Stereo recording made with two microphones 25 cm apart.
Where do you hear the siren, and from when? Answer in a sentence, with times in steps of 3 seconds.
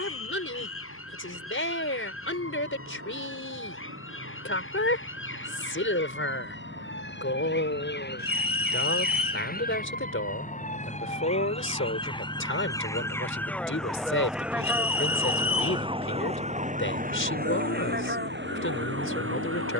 You can hear the siren on the left from 0 s, in the centre from 12 s and on the right from 15 s.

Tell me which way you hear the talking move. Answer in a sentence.
You can hear the talking stay put.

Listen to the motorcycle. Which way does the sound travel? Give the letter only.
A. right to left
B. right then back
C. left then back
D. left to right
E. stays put
A.